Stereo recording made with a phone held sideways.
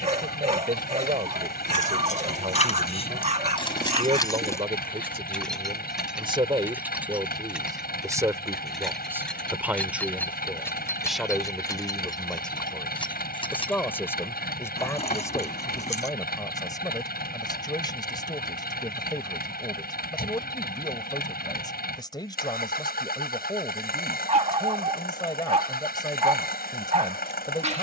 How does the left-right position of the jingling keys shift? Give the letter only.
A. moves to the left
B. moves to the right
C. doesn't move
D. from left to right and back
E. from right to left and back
D.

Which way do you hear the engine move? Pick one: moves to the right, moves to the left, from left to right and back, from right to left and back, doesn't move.
doesn't move.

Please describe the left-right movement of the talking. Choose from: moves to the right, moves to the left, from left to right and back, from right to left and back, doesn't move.
moves to the left.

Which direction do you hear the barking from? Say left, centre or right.
right.